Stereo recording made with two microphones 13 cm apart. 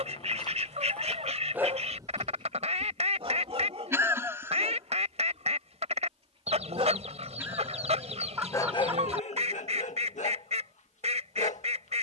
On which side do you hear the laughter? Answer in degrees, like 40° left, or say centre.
20° right.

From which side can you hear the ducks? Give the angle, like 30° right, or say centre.
60° right.